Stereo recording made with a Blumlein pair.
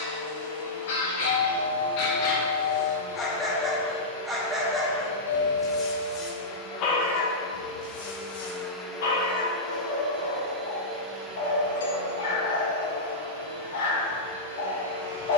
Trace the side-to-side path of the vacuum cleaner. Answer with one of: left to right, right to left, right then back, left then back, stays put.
left to right.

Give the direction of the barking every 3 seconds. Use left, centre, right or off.
left, centre, left, left, left.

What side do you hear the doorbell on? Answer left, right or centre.
left.